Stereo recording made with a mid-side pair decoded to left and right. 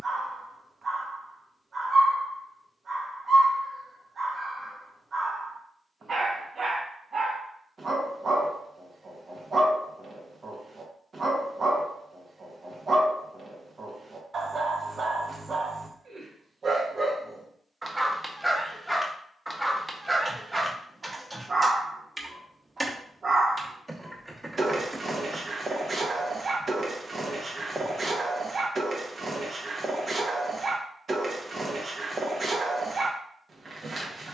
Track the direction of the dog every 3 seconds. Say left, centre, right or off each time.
right, right, right, right, right, right, centre, right, right, right, right, right.